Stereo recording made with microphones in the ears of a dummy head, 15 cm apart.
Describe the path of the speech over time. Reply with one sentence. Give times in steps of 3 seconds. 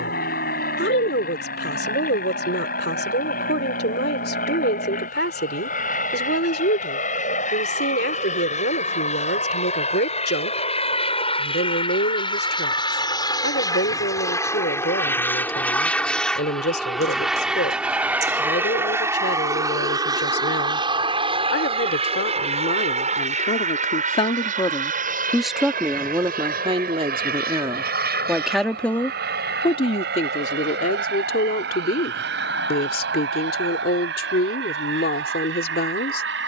You can hear the speech on the left from 0 s, in the centre from 24 s and on the left from 30 s.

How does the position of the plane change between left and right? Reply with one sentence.
In this clip you hear the plane move to the right.